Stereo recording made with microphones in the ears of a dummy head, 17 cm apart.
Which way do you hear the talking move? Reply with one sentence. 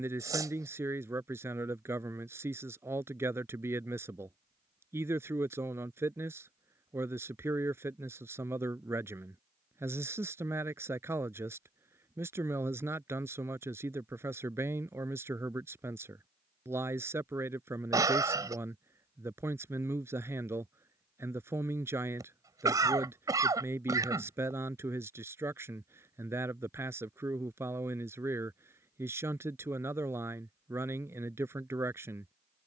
You can hear the talking stay in one place.